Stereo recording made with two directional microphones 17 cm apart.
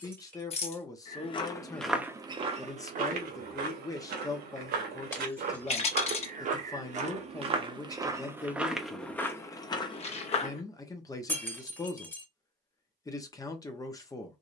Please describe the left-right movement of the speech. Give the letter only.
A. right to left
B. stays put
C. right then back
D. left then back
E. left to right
B.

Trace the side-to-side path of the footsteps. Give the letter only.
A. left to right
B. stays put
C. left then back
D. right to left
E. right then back
E.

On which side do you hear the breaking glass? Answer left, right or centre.
centre.